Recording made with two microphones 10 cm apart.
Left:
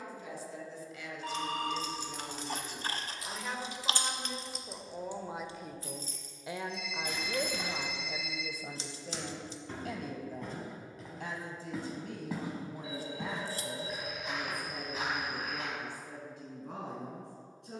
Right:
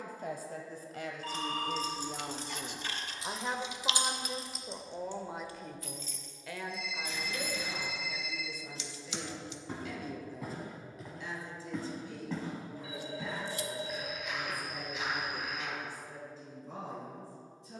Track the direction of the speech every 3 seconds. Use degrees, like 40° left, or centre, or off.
50° right, 10° right, 40° left, 60° left, 70° left, 70° left.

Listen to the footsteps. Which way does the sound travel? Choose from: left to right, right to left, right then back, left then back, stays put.
right to left.